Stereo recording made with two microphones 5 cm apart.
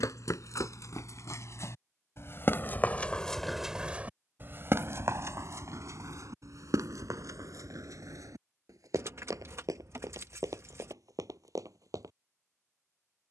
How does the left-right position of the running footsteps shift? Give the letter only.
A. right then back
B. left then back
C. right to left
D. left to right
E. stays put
D.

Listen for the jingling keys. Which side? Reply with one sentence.
You can hear the jingling keys on the right.